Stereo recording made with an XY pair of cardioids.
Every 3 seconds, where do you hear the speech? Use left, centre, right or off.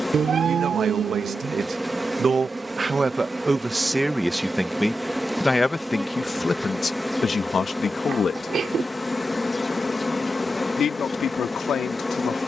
right, centre, left, left.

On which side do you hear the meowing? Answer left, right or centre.
right.